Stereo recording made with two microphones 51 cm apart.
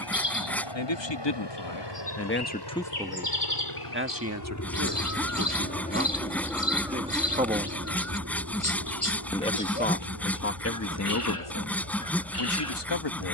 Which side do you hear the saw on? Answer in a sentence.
You can hear the saw in the centre.